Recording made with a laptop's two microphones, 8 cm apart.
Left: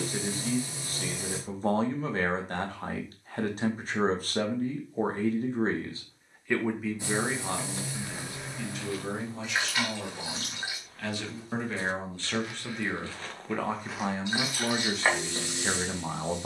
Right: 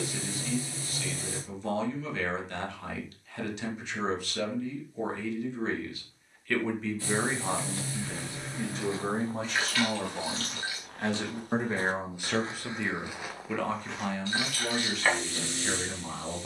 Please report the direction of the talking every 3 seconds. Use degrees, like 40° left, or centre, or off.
40° left, 40° left, 10° right, 30° right, 10° left, 30° left.